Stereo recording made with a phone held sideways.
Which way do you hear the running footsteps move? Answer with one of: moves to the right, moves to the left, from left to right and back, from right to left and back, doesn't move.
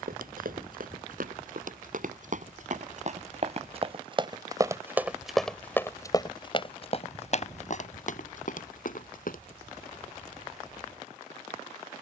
moves to the left.